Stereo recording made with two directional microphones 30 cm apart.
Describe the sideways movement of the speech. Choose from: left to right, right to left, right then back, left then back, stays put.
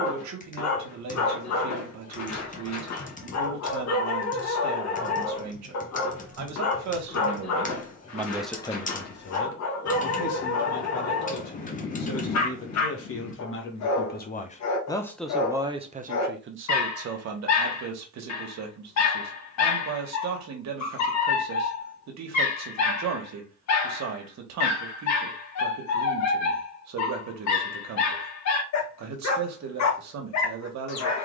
left then back.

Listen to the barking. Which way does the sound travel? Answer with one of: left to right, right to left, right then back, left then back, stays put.
stays put.